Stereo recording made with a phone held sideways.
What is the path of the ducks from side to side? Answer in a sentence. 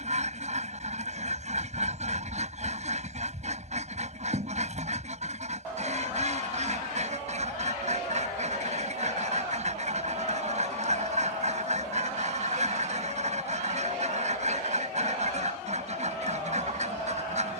In this clip you hear the ducks stay put.